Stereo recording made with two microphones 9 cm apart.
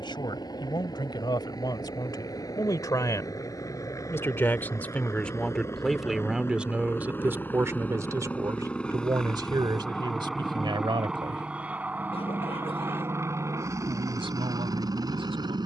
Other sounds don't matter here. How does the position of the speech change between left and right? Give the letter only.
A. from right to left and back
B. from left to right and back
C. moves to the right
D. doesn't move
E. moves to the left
C.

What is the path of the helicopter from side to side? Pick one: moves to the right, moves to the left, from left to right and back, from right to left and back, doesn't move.
moves to the right.